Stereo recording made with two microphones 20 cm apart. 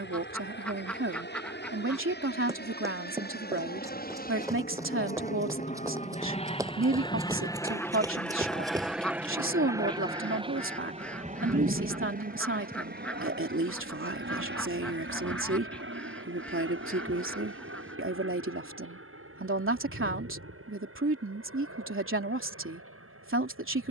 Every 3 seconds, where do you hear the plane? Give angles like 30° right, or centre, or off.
60° left, 50° left, 20° left, 20° right, 50° right, 60° right, 70° right, 70° right.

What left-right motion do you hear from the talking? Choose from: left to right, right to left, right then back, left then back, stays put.
stays put.